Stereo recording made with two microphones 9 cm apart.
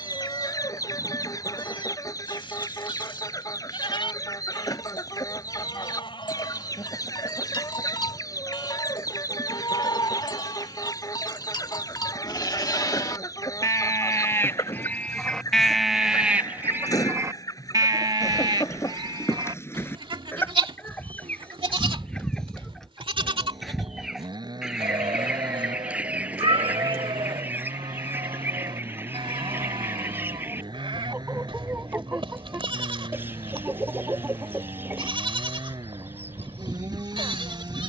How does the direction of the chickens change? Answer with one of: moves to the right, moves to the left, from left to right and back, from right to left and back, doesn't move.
moves to the right.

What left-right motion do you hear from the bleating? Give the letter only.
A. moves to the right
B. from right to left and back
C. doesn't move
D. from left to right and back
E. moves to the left
A.